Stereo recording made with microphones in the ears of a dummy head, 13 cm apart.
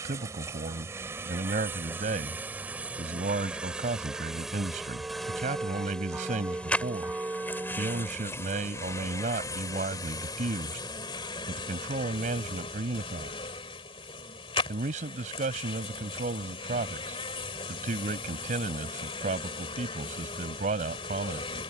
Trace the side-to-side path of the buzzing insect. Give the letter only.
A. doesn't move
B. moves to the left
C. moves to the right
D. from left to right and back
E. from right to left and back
B.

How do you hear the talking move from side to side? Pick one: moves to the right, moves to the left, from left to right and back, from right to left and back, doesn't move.
doesn't move.